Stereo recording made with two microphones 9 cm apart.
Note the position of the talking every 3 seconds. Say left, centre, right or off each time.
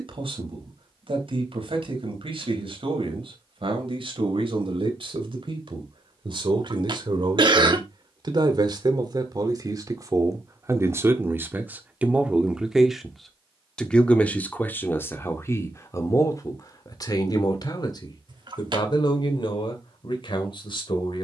right, right, right, right, centre, left, left.